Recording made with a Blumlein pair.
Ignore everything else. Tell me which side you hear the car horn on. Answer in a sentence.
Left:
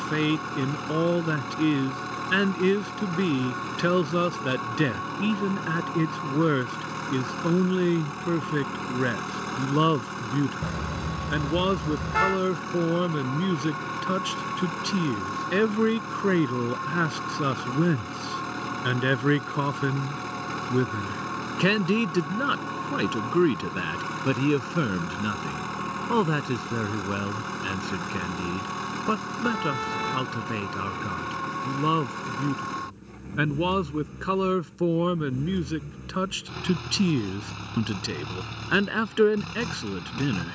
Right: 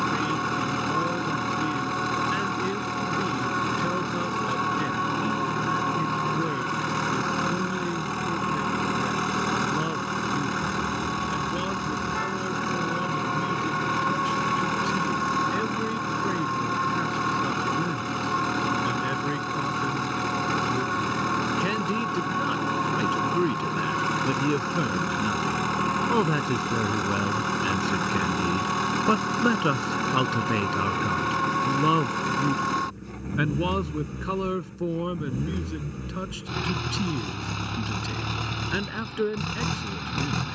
In this clip you hear the car horn on the left.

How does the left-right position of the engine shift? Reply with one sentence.
In this clip you hear the engine stay put.